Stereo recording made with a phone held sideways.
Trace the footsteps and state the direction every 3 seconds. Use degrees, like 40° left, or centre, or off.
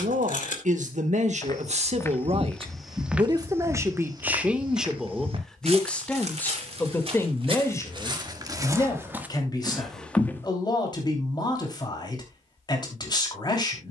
10° left, 30° right, 40° right, centre, off.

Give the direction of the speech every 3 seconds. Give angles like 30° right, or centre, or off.
60° right, 10° right, 20° left, 30° left, 30° left.